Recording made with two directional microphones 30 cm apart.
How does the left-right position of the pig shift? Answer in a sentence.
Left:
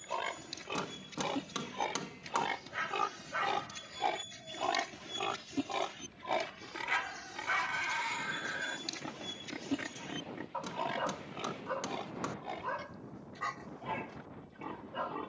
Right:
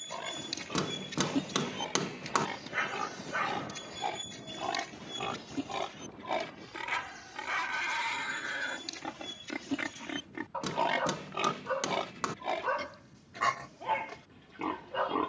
You can hear the pig go from the left side to the right.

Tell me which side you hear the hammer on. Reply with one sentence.
You can hear the hammer on the right.